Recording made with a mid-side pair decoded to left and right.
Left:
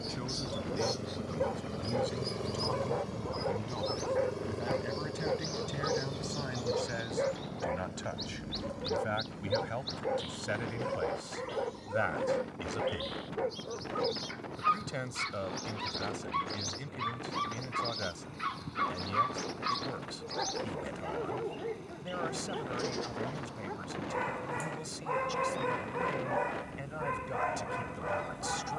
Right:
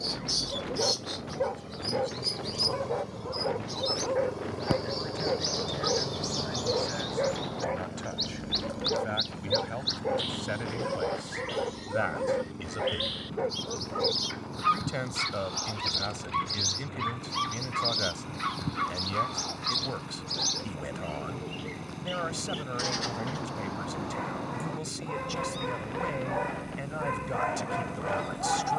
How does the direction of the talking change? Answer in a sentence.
You can hear the talking move to the right.